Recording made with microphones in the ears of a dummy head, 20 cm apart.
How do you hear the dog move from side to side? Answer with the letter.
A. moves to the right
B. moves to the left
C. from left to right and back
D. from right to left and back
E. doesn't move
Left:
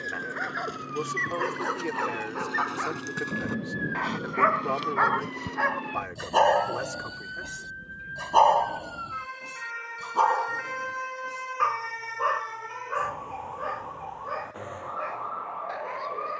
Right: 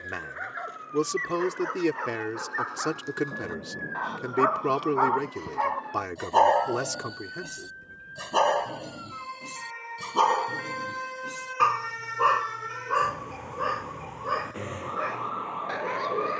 A.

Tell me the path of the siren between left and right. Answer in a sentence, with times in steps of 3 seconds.
You can hear the siren on the left from 0 s, in the centre from 9 s and on the right from 12 s.